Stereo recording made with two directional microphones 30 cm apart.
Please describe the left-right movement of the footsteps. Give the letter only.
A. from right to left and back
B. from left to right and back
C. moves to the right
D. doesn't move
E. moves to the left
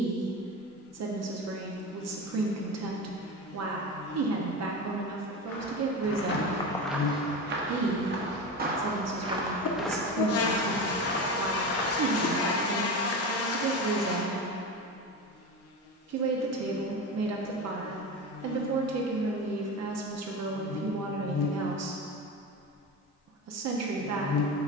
B.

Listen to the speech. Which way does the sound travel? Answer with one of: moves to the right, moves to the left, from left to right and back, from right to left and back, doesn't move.
doesn't move.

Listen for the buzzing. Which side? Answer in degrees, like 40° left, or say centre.
50° left.